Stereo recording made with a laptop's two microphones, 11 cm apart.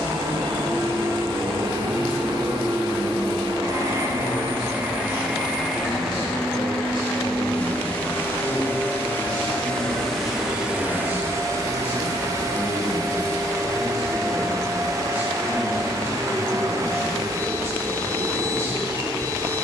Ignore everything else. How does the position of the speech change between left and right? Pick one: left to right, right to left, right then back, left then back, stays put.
left to right.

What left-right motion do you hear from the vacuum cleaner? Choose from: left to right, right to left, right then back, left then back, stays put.
left then back.